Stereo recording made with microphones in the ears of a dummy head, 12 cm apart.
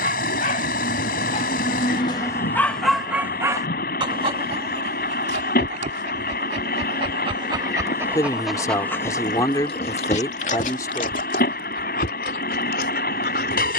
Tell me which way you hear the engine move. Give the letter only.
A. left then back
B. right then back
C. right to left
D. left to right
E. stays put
E.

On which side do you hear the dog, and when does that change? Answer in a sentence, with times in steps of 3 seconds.
You can hear the dog on the left from 0 s, on the right from 3 s and on the left from 9 s.